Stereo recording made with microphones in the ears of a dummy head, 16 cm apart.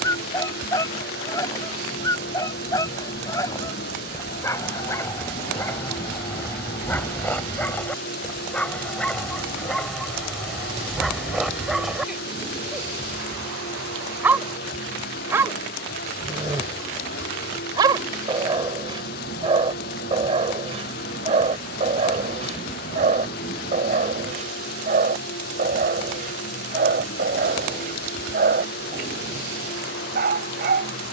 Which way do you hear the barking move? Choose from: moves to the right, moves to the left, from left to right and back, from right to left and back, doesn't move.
moves to the right.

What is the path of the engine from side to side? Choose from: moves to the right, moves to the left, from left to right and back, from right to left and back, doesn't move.
doesn't move.